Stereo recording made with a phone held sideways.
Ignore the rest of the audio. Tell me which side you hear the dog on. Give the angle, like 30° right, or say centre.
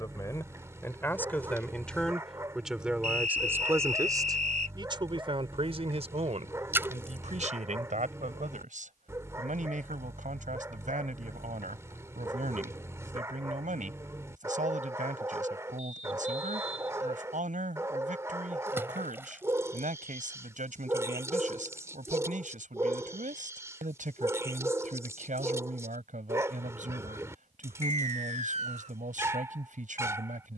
20° right.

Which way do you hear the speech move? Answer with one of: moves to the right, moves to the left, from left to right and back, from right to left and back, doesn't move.
moves to the right.